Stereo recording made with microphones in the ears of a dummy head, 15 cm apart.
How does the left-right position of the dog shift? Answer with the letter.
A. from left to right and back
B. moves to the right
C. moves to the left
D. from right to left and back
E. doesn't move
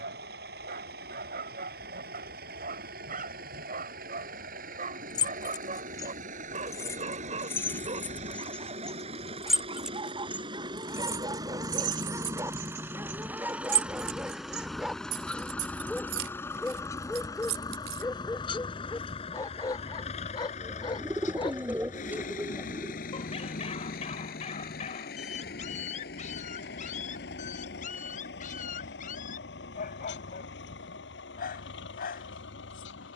C.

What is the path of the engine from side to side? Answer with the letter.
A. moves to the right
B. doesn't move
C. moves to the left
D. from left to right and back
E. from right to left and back
C.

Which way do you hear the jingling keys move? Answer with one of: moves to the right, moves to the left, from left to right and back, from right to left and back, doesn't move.
moves to the right.